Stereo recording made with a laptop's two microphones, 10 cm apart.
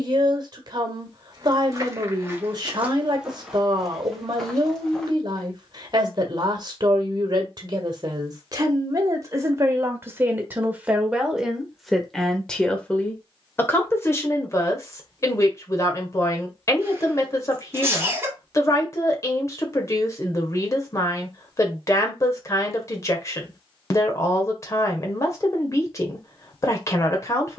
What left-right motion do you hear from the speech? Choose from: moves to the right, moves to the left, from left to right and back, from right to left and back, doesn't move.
moves to the left.